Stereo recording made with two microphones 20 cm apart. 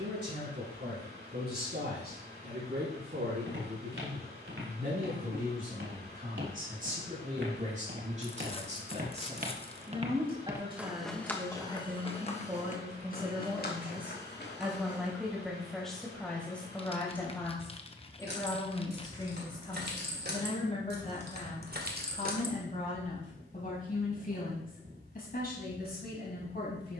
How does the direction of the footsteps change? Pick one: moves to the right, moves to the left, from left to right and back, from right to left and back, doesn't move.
moves to the left.